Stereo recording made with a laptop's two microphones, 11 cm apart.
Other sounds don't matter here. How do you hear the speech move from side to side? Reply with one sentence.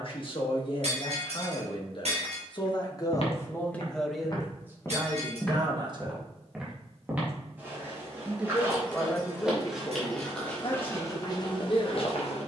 You can hear the speech move from left to right and back again.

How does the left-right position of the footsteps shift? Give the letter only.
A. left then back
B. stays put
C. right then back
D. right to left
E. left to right
C.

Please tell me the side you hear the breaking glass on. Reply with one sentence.
In this clip you hear the breaking glass on the right.